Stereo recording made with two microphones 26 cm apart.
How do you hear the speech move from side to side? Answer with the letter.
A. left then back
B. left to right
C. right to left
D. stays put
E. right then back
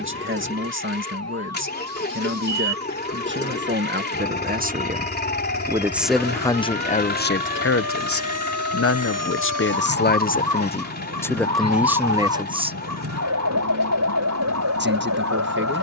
A.